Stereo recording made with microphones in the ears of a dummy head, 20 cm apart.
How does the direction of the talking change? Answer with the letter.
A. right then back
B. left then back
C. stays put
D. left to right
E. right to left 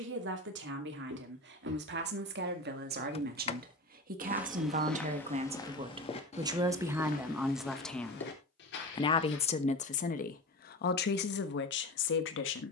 E.